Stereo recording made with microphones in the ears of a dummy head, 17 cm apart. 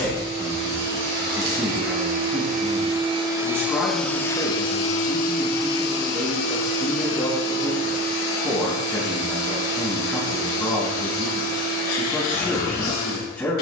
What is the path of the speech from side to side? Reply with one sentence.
You can hear the speech stay in one place.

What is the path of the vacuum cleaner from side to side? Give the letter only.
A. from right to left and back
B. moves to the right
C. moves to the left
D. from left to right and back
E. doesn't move
C.